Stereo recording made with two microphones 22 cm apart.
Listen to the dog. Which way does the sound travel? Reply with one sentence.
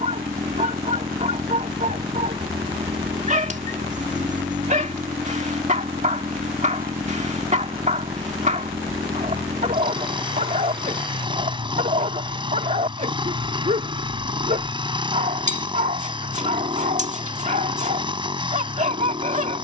In this clip you hear the dog stay put.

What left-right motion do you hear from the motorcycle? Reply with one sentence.
You can hear the motorcycle stay put.